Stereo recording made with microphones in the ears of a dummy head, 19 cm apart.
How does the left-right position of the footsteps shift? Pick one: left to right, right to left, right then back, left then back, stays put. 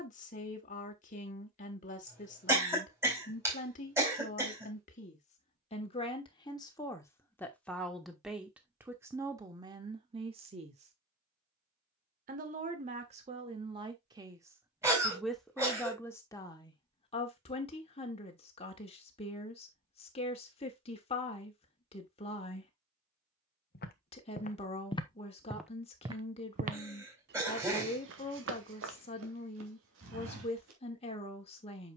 left to right.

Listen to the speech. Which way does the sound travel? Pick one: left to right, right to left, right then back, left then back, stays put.
right then back.